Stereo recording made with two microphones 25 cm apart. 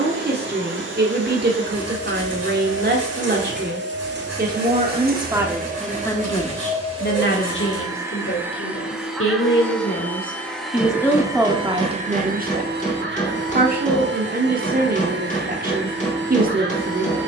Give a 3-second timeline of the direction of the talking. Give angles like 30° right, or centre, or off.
40° right, 30° right, 40° left, 20° left, 30° right, 40° right.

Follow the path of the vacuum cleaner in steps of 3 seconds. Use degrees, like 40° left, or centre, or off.
50° right, 40° right, 20° right, centre, 40° right, 50° right.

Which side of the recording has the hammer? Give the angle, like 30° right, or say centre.
30° left.